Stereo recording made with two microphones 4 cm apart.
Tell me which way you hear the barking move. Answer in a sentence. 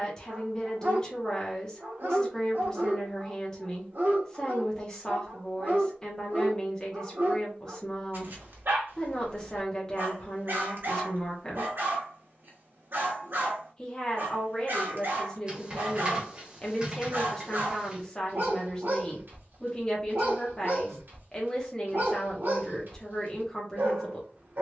You can hear the barking stay put.